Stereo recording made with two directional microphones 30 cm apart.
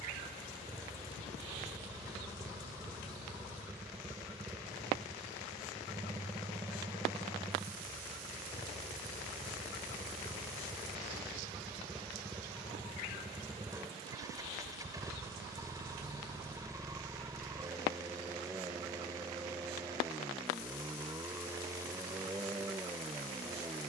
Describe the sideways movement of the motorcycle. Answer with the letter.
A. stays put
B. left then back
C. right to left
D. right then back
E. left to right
A.